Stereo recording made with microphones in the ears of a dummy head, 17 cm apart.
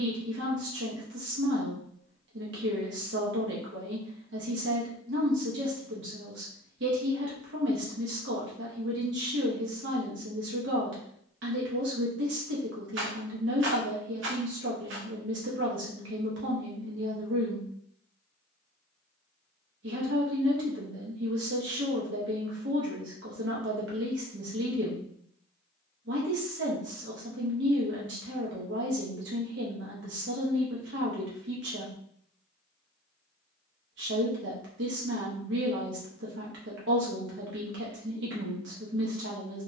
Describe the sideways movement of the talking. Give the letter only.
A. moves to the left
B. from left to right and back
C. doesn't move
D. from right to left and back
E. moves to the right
C.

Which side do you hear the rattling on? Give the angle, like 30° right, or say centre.
70° right.